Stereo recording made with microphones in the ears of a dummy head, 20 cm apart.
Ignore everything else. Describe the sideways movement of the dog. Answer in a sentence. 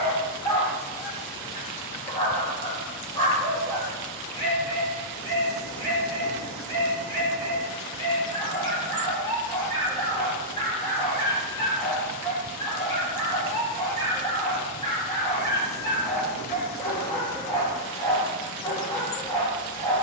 In this clip you hear the dog stay in one place.